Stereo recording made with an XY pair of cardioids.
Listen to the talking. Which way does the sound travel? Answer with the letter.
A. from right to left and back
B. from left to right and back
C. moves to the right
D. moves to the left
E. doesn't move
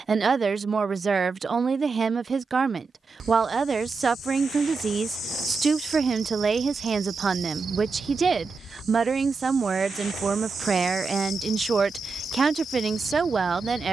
E.